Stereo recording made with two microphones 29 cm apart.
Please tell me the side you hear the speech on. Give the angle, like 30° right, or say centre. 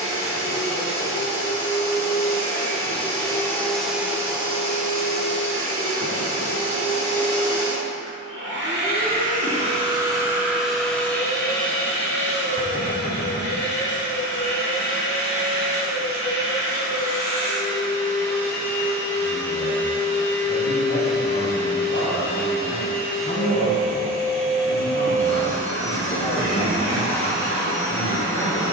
50° left.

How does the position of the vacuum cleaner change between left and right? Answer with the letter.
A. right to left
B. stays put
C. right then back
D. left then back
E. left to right
C.